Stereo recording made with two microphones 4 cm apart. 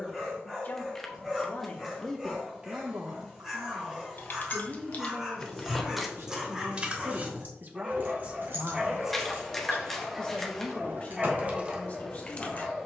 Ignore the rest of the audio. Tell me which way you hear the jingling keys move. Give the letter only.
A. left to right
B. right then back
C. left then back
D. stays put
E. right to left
B.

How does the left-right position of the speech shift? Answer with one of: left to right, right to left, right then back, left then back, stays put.
right then back.